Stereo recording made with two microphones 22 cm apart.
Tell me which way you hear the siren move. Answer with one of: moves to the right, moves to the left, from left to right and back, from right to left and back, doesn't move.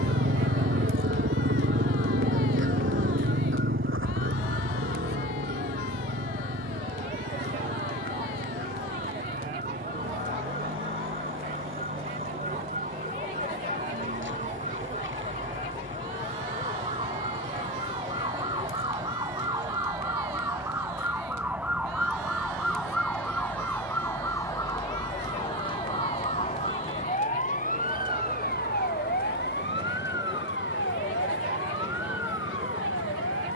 moves to the left.